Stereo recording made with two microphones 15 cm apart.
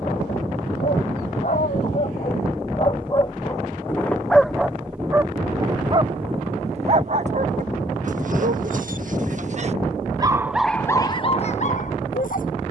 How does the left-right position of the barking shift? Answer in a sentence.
You can hear the barking move from left to right and back again.